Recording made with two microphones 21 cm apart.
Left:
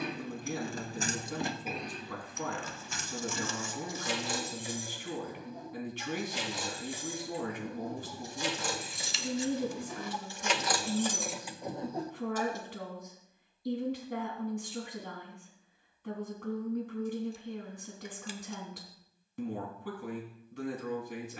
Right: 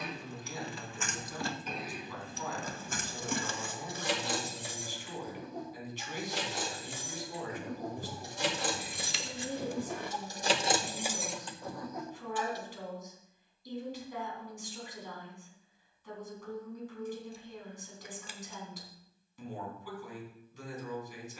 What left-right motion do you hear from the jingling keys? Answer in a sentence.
In this clip you hear the jingling keys go right and come back.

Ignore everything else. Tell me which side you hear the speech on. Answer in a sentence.
In this clip you hear the speech on the left.